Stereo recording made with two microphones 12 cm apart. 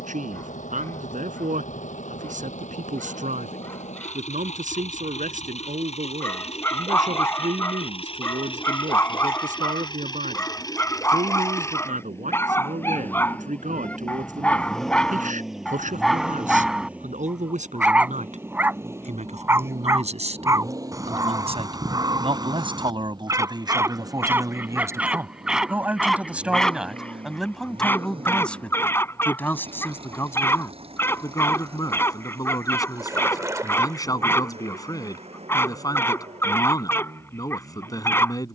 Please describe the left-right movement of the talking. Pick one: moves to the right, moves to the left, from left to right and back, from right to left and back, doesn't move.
moves to the left.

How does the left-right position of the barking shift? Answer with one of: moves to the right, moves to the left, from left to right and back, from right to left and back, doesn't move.
from left to right and back.